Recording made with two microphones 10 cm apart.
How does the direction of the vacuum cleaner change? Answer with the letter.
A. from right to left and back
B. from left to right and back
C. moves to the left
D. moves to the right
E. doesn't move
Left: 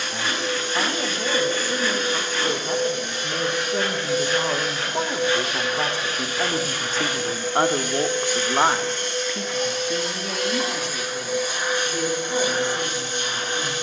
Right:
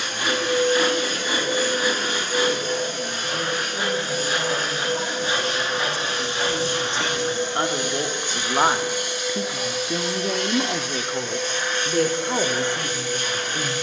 C.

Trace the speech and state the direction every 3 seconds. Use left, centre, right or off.
left, left, left, right, right.